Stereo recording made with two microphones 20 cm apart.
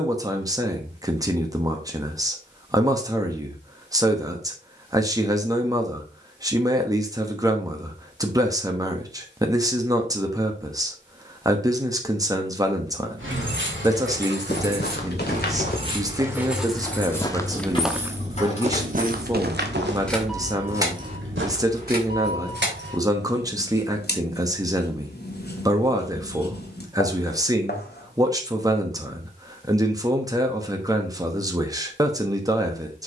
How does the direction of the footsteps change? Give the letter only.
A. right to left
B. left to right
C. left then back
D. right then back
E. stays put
B.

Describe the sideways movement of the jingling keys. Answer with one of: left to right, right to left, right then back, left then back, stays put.
left then back.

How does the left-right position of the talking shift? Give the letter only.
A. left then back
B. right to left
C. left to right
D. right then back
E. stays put
E.